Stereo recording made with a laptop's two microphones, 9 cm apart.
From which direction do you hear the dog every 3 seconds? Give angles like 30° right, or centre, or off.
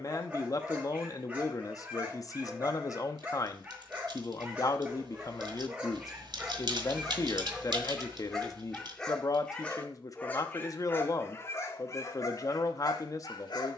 20° right, 20° right, 10° right, 20° left, 50° left.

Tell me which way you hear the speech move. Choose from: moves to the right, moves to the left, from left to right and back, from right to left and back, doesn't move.
doesn't move.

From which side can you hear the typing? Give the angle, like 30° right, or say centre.
60° right.